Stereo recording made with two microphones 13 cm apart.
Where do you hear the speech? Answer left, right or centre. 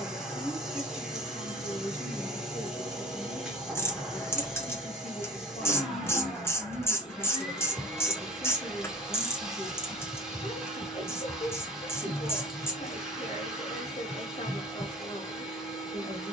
left.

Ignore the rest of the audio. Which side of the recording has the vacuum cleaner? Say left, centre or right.
centre.